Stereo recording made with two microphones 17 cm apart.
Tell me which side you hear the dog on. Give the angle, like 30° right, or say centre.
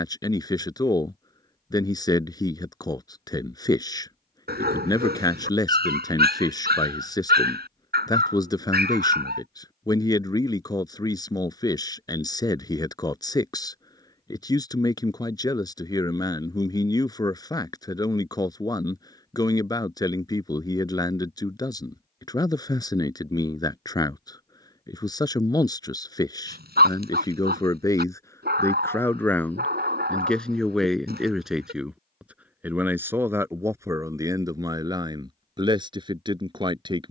70° right.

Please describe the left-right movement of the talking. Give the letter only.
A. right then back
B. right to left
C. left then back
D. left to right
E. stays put
D.